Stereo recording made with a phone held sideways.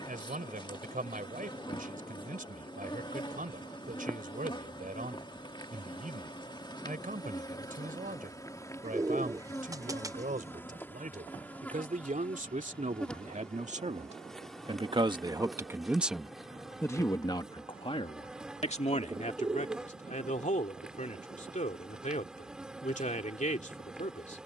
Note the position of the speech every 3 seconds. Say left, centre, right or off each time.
right, right, right, right, right, centre, left, left.